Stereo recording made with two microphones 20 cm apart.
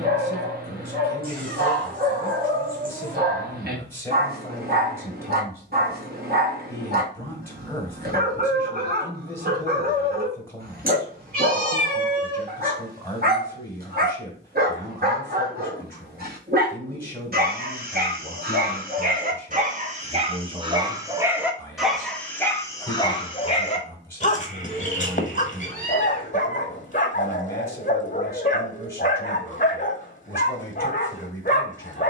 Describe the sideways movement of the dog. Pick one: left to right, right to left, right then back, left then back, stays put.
right to left.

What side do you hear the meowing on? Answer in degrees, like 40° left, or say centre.
50° right.